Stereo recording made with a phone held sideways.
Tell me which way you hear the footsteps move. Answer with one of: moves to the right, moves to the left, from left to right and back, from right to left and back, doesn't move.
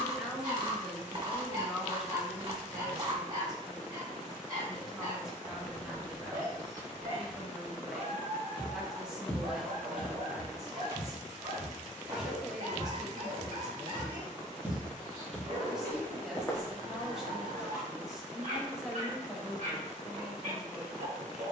from left to right and back.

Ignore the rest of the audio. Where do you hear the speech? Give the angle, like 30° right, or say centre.
centre.